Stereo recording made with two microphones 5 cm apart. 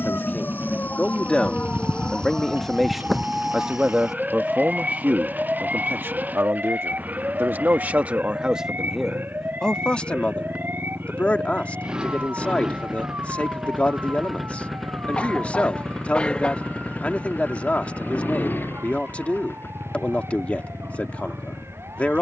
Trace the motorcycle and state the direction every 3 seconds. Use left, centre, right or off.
right, right, right, right, centre, left, left, left.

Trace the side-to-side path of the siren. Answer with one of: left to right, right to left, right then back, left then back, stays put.
left to right.